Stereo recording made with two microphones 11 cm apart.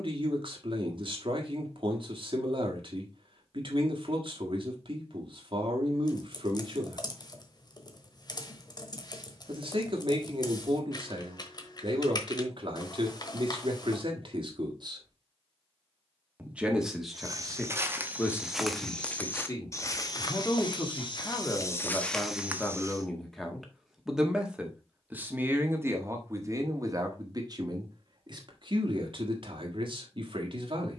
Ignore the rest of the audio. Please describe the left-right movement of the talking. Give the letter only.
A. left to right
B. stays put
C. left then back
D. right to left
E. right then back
C.